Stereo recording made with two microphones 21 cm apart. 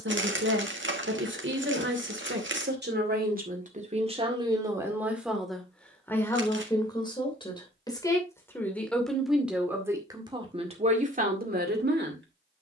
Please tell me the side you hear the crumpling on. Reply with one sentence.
You can hear the crumpling on the right.